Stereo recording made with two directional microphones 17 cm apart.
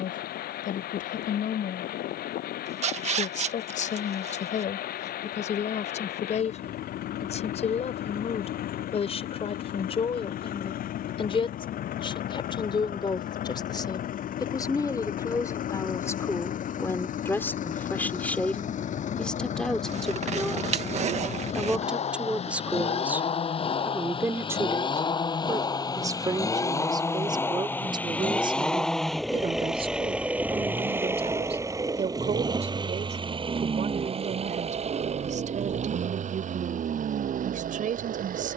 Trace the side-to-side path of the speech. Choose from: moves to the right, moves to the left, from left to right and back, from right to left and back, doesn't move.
moves to the right.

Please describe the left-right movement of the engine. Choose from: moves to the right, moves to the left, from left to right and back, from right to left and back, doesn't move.
moves to the right.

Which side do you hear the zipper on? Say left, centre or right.
right.